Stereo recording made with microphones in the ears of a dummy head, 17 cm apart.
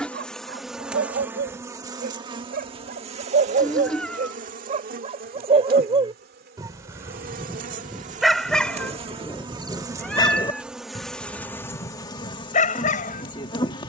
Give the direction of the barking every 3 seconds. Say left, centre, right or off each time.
right, right, centre, left, left.